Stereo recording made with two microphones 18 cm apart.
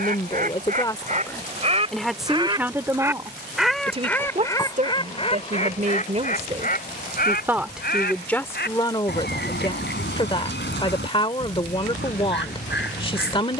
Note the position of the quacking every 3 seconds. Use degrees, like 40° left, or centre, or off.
40° right, 20° left, 60° left, 70° left, 80° left.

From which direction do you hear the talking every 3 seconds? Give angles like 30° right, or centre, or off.
10° left, 40° right, 10° right, 30° left, 30° left.